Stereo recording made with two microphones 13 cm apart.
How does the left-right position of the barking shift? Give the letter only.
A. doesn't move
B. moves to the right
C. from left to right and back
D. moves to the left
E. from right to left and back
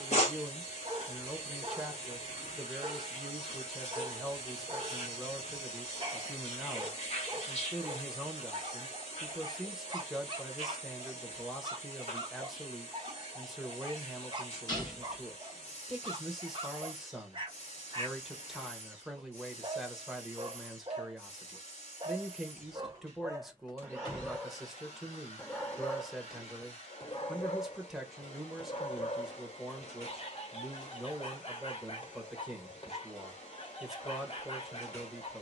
D.